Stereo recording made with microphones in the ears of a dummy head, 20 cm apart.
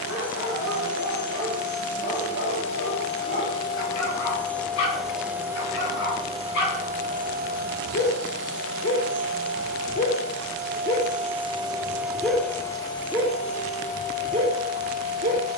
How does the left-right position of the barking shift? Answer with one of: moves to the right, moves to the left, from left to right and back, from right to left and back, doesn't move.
moves to the right.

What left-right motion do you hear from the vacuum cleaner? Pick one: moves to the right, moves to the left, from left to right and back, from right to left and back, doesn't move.
from left to right and back.